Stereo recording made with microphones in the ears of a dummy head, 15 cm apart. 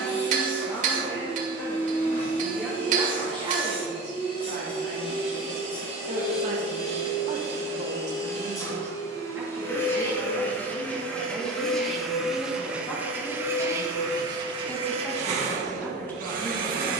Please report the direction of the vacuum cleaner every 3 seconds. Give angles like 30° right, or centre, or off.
40° left, 30° left, 30° left, 10° left, 20° right, 50° right.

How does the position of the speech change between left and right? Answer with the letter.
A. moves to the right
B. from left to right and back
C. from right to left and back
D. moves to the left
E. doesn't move
B.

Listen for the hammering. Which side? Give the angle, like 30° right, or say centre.
50° right.